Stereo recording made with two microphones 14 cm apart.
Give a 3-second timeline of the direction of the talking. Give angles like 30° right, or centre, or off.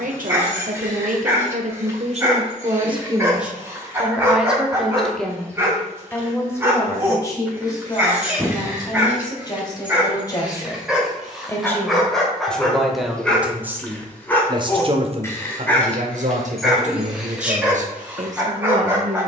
60° right, 10° right, 20° left, 20° left, 10° right, 50° right, 60° right.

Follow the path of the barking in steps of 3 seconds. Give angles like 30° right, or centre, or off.
20° right, 20° right, 20° right, 10° right, 10° left, centre, 10° right.